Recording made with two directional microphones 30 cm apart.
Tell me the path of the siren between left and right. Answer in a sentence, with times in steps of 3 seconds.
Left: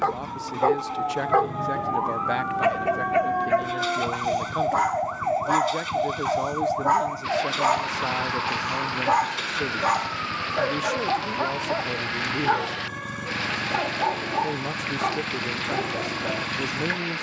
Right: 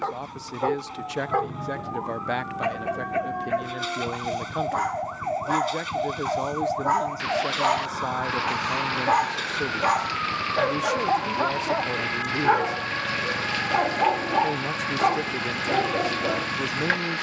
In this clip you hear the siren on the left from 0 s, in the centre from 6 s and on the right from 9 s.